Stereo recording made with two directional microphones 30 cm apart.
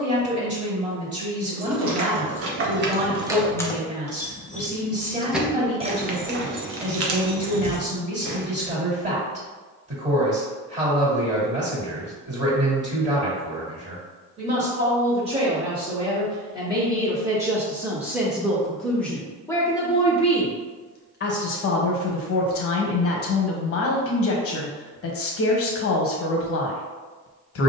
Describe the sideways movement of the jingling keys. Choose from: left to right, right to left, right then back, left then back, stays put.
left then back.